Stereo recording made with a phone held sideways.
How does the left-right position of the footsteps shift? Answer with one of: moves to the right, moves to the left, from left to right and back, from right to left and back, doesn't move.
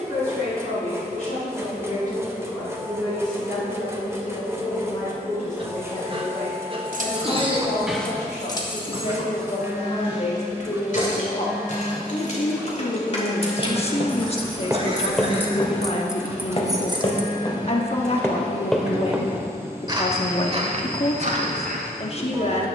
from right to left and back.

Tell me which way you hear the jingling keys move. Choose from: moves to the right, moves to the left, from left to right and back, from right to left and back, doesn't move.
from right to left and back.